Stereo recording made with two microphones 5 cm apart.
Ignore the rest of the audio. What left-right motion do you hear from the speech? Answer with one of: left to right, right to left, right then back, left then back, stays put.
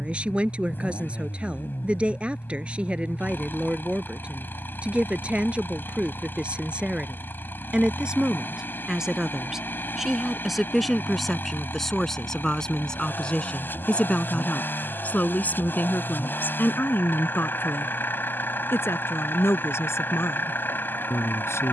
right to left.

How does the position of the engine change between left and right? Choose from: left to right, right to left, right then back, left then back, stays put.
stays put.